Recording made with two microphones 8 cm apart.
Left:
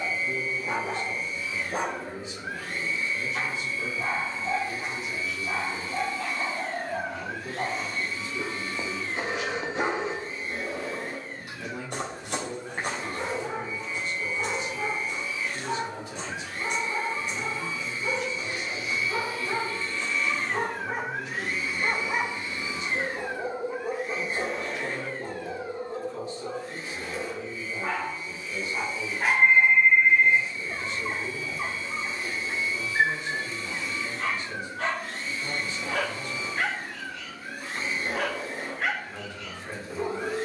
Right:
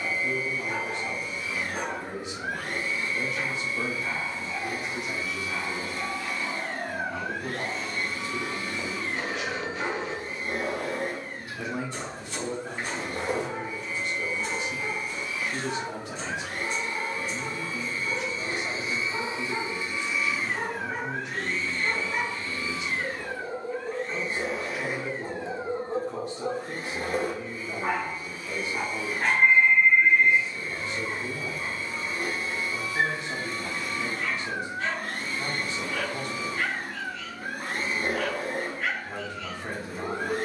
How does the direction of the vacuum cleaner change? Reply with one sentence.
You can hear the vacuum cleaner go left and come back.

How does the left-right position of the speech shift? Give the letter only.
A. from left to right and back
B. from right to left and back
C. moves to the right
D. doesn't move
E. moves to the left
D.